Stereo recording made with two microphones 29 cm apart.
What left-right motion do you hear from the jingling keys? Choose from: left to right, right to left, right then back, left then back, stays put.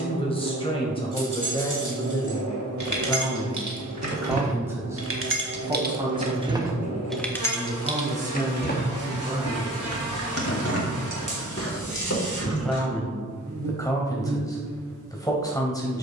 right to left.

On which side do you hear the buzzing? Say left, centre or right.
right.